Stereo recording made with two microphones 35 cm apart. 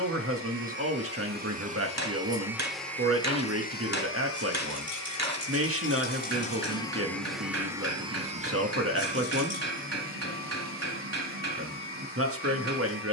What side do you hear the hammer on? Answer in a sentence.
You can hear the hammer on the right.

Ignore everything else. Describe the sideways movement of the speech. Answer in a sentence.
You can hear the speech stay put.